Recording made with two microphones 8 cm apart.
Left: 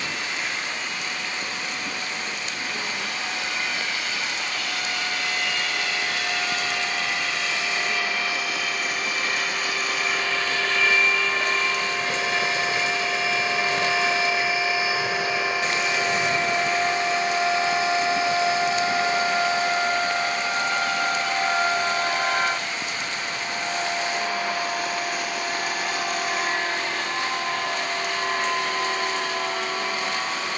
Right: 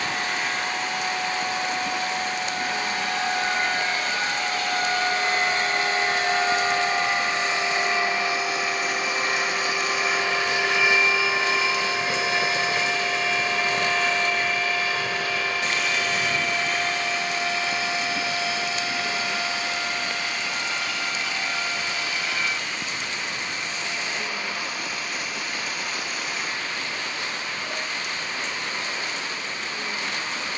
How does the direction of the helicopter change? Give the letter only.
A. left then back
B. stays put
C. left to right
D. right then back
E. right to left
E.